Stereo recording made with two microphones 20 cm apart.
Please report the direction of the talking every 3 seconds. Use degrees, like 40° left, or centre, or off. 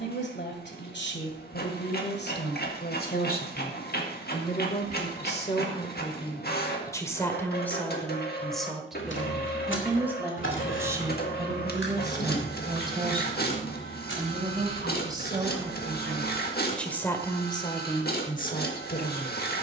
60° left, 40° left, 10° left, 10° right, 20° right, centre, 50° left.